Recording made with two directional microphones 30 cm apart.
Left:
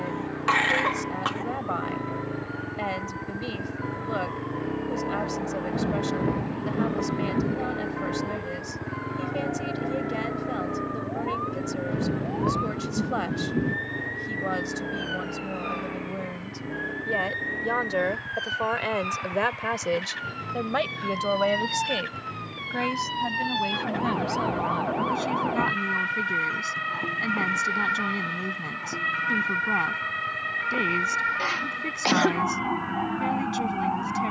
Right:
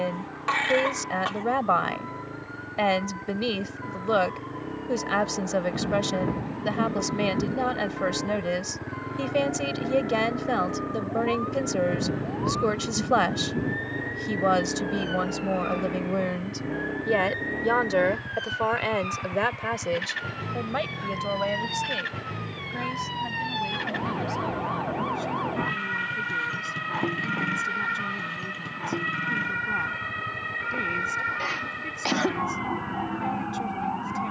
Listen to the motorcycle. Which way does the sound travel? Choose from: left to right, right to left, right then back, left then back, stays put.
left to right.